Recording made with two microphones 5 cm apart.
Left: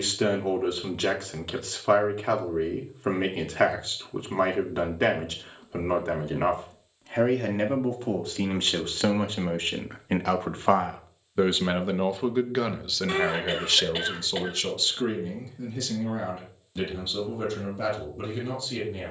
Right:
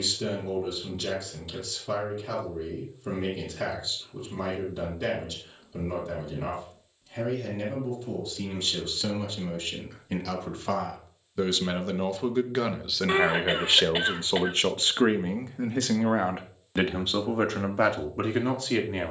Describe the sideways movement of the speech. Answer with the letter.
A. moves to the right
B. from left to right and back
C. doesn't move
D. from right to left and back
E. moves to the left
A.